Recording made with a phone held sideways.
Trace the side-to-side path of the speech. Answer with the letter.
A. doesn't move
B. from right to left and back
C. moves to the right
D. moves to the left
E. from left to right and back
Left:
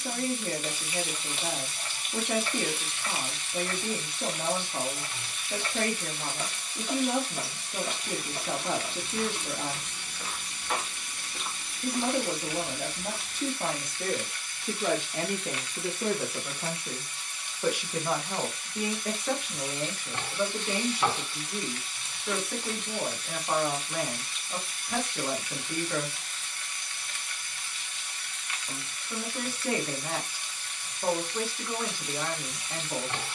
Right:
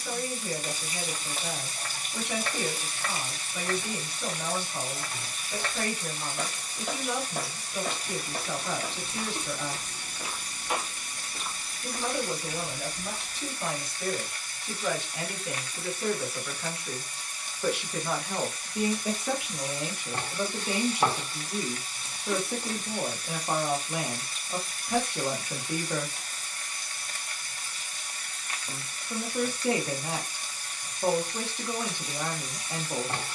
C.